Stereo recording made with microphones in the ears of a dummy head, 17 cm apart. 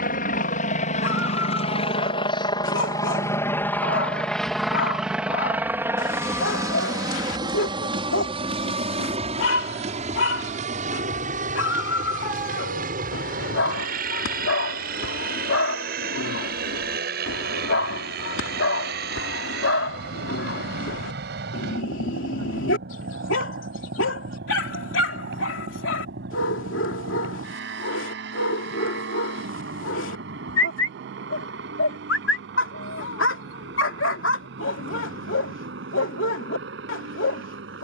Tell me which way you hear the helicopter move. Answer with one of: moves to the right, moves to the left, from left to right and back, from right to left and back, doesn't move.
moves to the right.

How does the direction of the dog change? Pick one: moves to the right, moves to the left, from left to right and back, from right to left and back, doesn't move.
doesn't move.